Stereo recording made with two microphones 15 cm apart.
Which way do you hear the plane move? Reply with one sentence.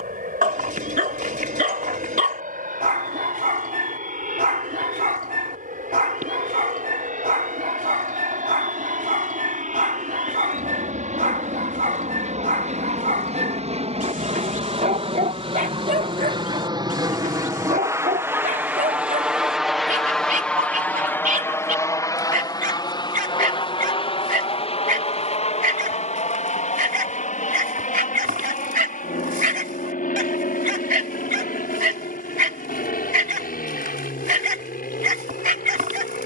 In this clip you hear the plane move from right to left.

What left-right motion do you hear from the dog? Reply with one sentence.
You can hear the dog stay put.